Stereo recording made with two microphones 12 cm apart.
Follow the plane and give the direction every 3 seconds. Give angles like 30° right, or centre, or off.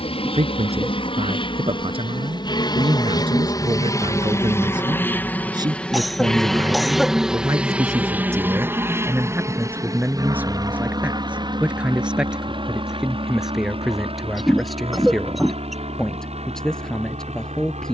40° left, 20° left, 10° right, 30° right, 40° right, 50° right.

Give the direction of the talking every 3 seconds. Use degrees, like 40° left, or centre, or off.
50° right, 40° right, 20° right, 10° right, centre, centre.